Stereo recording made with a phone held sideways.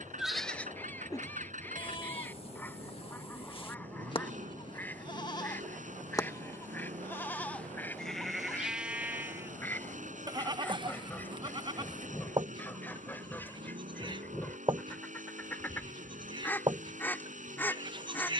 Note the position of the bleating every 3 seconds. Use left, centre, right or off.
left, left, centre, right, right, right.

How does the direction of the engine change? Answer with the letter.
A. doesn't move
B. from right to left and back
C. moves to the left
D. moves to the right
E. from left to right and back
A.